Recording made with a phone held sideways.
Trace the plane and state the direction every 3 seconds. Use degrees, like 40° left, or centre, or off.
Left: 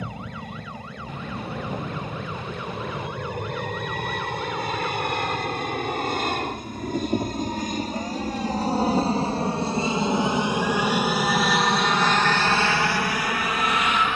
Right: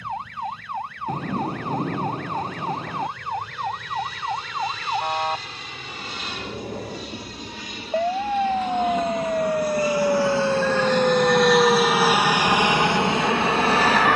70° left, 60° left, 50° left, 20° left, 20° right.